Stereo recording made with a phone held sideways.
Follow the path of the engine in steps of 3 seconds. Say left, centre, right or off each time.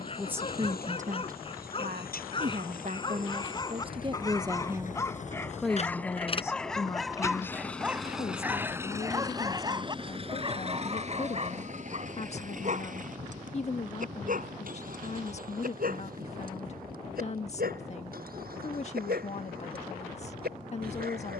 left, left, centre, right, right, right, right.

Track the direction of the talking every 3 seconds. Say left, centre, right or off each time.
right, right, left, left, left, left, left.